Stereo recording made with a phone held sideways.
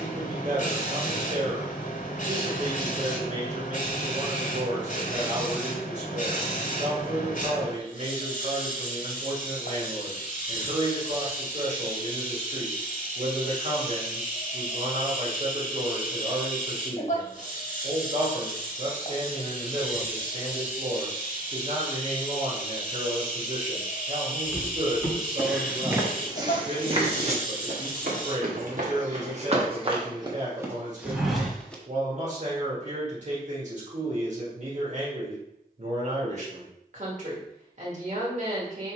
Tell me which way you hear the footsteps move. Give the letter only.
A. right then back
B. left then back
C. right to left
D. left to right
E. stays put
A.